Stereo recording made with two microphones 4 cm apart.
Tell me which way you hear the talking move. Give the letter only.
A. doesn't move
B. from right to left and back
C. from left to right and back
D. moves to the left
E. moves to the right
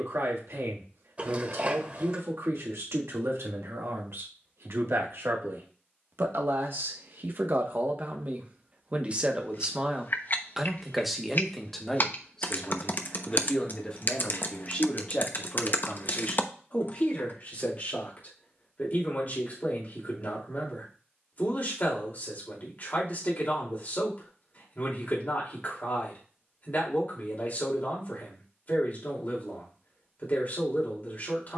D.